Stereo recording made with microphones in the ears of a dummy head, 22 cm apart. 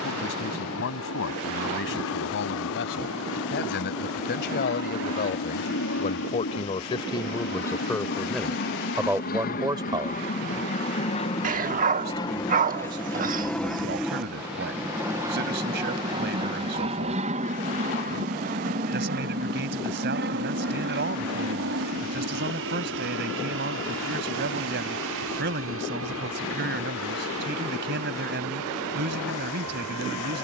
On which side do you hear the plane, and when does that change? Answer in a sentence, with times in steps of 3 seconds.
You can hear the plane on the left from 0 s, in the centre from 12 s and on the right from 15 s.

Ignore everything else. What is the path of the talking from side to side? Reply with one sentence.
In this clip you hear the talking move from left to right.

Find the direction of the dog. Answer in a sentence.
In this clip you hear the dog on the right.